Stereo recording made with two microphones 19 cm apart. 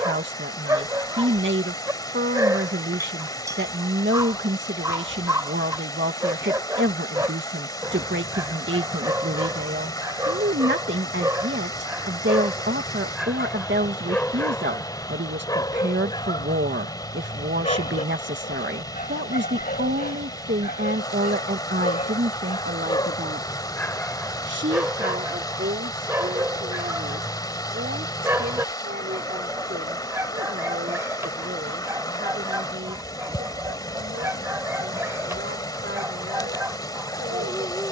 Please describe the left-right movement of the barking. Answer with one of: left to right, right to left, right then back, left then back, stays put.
left then back.